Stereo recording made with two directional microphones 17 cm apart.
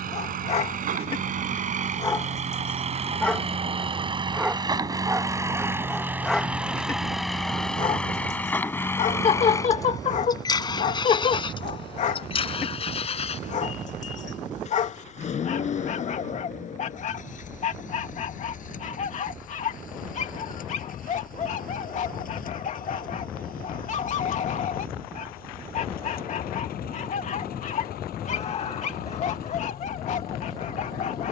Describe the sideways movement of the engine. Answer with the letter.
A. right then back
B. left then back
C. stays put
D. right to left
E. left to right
D.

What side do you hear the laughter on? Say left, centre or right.
left.